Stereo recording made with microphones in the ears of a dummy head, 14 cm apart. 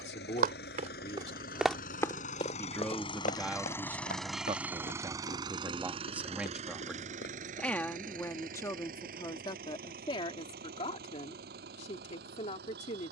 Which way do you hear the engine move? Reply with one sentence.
You can hear the engine move to the right.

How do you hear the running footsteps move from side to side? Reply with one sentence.
You can hear the running footsteps move from right to left.